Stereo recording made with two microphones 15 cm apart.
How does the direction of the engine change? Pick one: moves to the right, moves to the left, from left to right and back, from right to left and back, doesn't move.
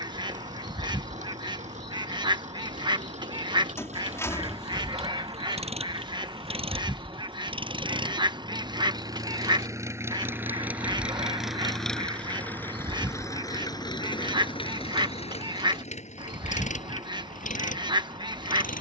moves to the left.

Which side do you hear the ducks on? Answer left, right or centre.
right.